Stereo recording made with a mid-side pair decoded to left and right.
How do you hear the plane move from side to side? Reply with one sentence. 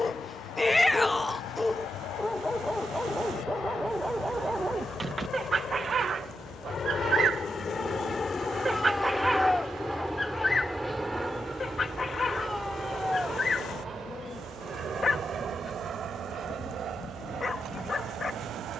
In this clip you hear the plane travel towards the right.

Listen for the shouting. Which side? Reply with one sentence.
You can hear the shouting in the centre.